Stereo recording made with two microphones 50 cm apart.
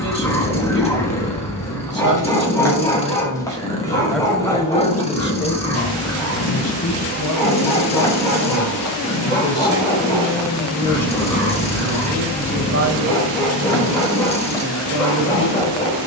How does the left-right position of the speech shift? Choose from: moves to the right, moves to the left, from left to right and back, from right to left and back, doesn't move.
from right to left and back.